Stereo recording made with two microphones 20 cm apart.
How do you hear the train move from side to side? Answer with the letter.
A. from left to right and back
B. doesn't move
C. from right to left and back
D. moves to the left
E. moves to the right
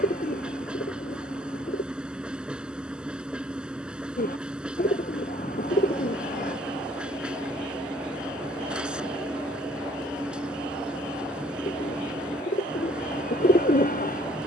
B.